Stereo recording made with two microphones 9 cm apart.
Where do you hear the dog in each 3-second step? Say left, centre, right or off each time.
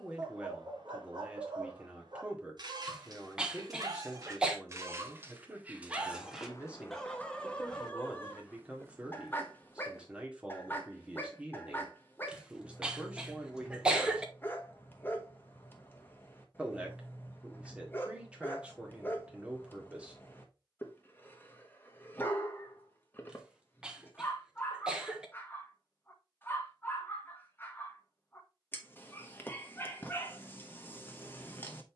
right, right, centre, left, left, left, left, left, left, left, left.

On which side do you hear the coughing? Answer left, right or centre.
centre.